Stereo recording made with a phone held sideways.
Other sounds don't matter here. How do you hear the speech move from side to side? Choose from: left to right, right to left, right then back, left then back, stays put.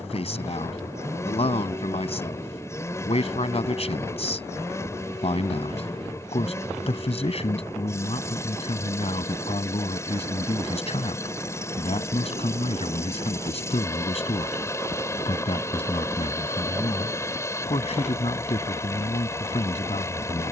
stays put.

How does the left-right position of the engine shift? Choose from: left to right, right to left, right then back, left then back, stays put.
stays put.